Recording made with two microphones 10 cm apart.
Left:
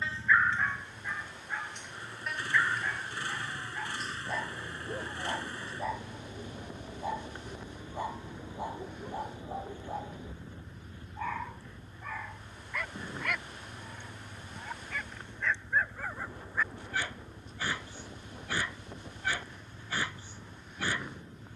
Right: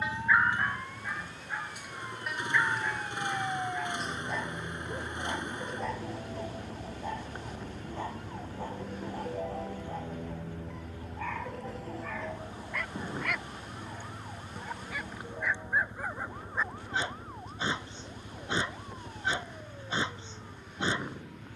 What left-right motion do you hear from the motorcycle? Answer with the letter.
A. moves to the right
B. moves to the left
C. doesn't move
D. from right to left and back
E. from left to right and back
C.